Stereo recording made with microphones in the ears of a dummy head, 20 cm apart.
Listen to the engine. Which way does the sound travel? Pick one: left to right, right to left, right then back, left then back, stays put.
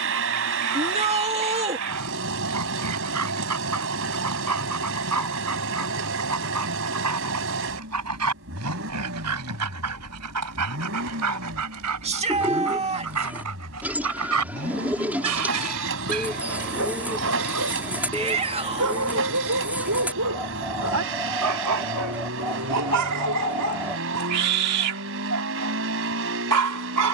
stays put.